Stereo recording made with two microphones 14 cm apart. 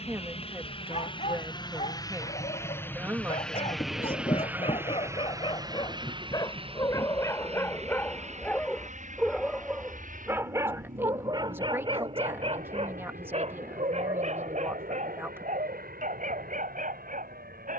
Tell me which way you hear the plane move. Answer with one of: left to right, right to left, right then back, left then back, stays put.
left to right.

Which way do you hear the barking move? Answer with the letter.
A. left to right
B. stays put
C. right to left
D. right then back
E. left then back
A.